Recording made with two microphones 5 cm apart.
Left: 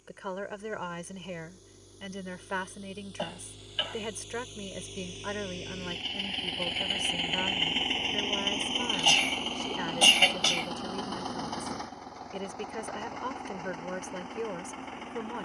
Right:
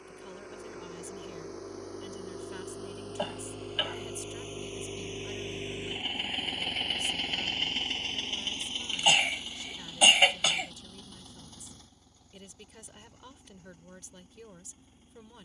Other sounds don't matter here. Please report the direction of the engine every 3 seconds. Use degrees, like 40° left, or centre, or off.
60° right, 40° right, 20° left, 60° left, 70° left.